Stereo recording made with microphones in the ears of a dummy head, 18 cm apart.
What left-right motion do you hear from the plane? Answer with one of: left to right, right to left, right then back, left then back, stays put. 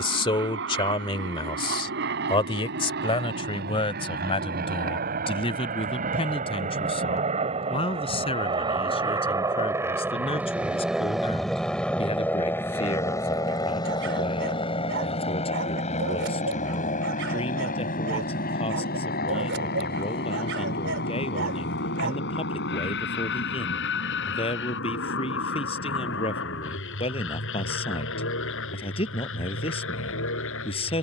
right to left.